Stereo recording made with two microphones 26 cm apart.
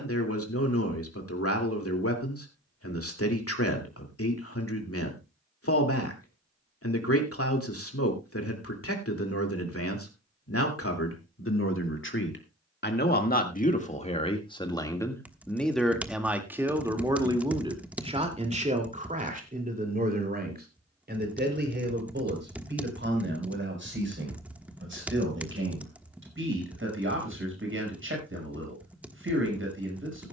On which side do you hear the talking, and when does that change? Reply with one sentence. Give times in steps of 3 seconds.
In this clip you hear the talking on the left from 0 s, in the centre from 15 s and on the right from 18 s.